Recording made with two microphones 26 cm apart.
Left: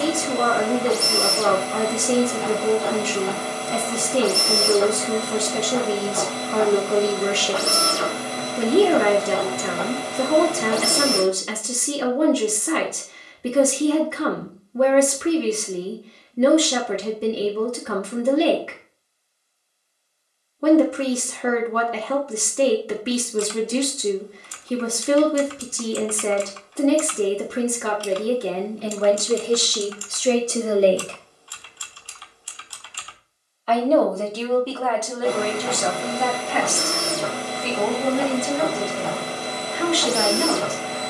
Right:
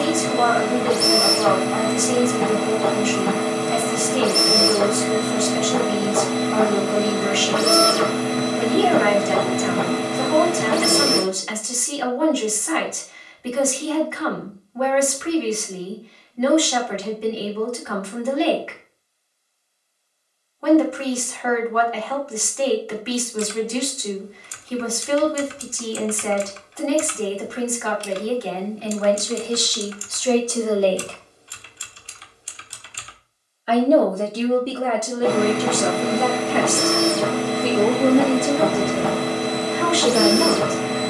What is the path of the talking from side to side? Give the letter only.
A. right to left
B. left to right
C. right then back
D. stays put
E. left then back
B.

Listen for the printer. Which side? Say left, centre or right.
right.